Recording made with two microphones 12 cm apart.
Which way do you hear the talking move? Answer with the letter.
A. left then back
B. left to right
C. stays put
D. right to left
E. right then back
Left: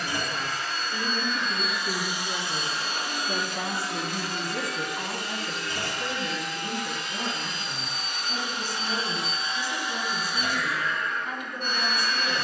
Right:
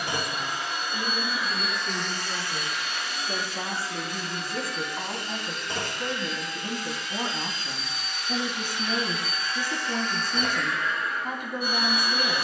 B.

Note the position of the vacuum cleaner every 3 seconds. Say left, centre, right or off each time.
centre, left, left, centre.